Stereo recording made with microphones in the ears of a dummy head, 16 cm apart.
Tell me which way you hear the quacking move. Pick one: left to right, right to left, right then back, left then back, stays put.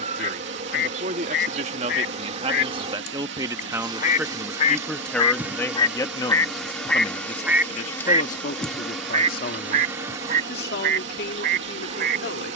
left to right.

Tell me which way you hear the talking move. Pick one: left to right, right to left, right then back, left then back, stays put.
right to left.